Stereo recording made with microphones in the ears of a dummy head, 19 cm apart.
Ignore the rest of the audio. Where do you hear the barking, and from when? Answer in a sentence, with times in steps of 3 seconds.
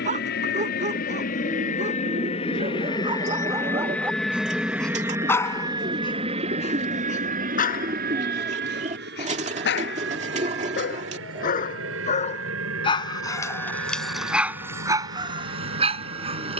In this clip you hear the barking on the right from 0 s, in the centre from 3 s, on the left from 6 s, in the centre from 12 s and on the right from 15 s.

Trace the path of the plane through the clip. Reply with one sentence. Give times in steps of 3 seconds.
In this clip you hear the plane on the left from 0 s, in the centre from 3 s and on the right from 6 s.